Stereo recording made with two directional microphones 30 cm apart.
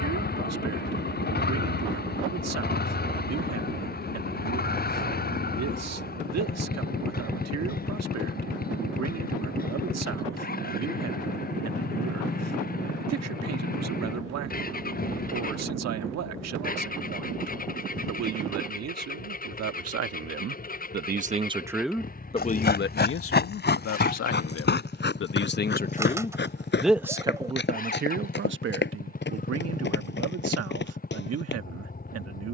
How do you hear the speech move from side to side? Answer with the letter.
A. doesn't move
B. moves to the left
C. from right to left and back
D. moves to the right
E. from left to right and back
C.